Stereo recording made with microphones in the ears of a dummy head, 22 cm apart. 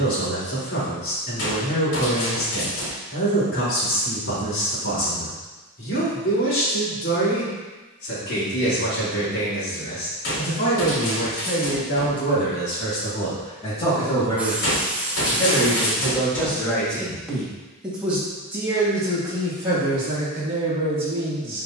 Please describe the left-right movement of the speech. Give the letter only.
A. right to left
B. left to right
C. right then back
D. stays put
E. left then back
B.